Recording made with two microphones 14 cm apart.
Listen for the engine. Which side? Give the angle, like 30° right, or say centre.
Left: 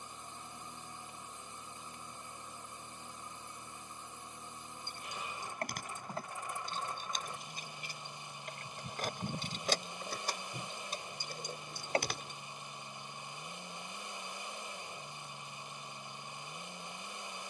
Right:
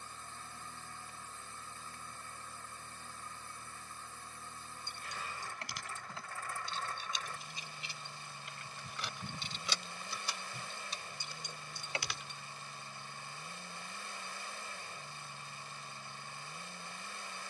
20° left.